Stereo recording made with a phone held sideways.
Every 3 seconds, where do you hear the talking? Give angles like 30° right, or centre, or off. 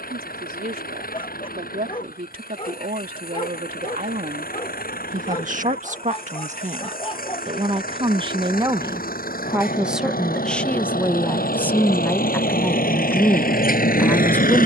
70° right, 60° right, 40° right, 10° left, 10° left.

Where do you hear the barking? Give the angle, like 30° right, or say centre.
40° left.